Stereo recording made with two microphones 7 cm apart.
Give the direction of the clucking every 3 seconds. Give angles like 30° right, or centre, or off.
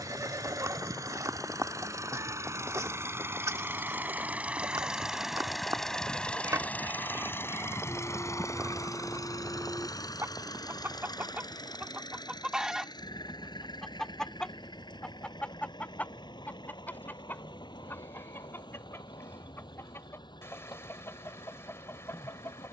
40° right, 40° right, 40° right, 30° right, centre, 20° left, 30° left, 30° left.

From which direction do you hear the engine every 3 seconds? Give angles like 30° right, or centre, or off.
50° right, 20° right, 30° left, 60° left, 70° left, 80° left, 80° left, 80° left.